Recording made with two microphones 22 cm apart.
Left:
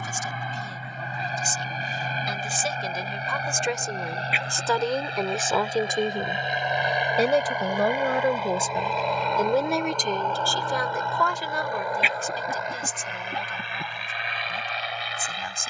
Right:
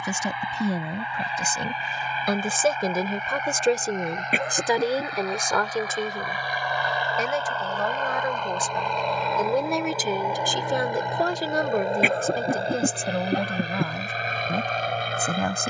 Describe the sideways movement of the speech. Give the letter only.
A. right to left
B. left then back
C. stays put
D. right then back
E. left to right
B.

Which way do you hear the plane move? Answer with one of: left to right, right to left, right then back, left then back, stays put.
left to right.